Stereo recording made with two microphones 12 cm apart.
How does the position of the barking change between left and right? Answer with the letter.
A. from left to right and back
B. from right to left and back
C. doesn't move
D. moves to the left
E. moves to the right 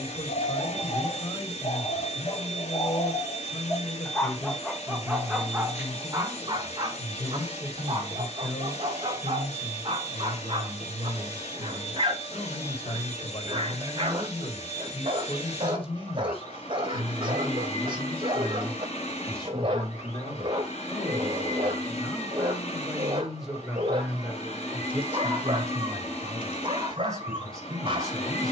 E.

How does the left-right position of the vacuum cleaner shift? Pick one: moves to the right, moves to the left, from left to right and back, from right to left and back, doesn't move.
doesn't move.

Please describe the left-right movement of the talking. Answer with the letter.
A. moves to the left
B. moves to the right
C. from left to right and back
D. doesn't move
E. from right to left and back
B.